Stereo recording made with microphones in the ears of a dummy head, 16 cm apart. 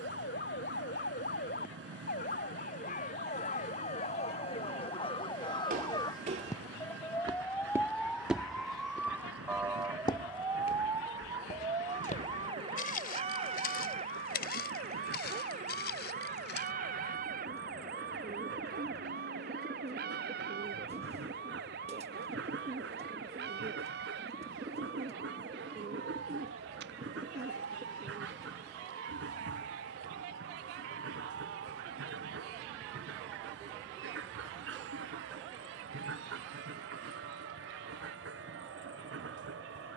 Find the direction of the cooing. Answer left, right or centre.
right.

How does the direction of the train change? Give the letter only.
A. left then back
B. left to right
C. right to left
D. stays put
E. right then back
D.